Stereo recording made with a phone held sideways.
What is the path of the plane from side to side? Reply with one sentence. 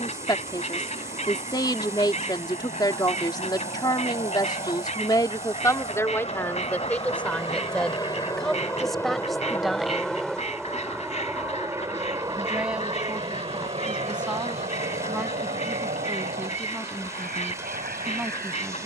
In this clip you hear the plane move to the right.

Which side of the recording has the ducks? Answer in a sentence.
You can hear the ducks on the left.